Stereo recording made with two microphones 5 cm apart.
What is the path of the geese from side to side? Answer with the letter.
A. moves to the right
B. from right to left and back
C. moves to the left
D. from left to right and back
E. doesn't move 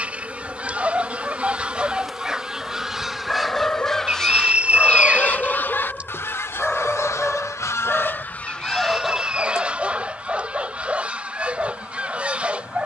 B.